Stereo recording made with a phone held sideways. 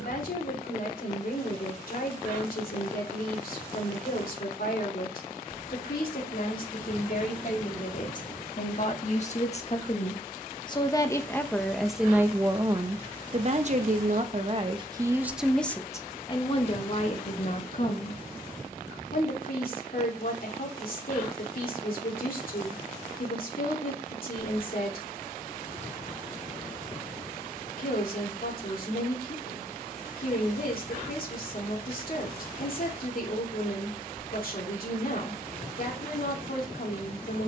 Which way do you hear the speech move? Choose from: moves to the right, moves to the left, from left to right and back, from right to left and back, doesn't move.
from left to right and back.